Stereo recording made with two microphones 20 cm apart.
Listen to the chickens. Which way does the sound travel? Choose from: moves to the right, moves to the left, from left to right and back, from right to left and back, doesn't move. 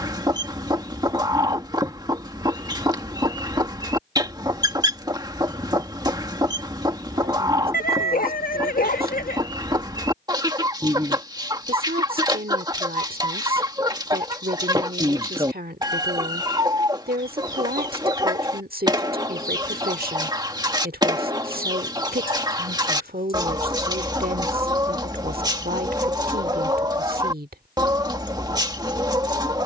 doesn't move.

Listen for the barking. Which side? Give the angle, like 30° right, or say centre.
50° left.